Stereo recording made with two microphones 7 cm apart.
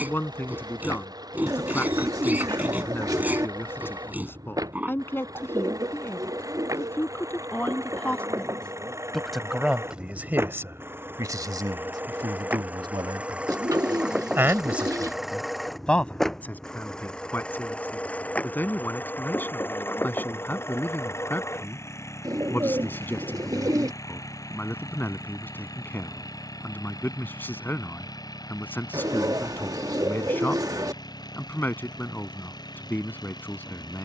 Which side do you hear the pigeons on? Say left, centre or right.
right.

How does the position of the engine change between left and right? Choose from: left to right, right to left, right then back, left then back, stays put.
right to left.